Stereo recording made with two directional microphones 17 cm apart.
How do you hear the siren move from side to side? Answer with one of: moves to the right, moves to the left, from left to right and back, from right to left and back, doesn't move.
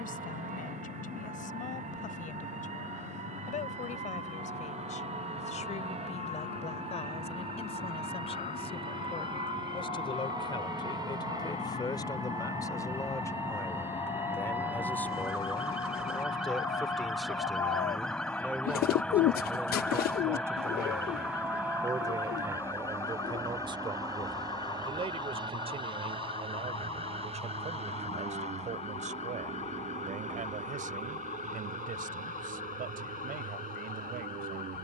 moves to the left.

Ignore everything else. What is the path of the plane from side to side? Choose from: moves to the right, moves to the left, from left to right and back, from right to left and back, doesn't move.
moves to the right.